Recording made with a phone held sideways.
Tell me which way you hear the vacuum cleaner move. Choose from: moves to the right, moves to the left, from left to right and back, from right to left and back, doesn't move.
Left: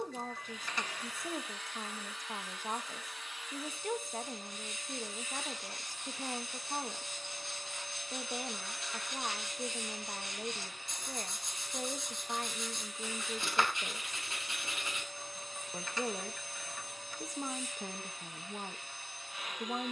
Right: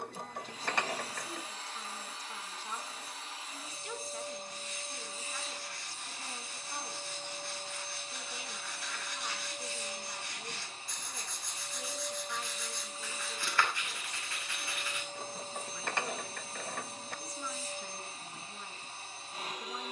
doesn't move.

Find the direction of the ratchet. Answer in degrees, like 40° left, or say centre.
60° right.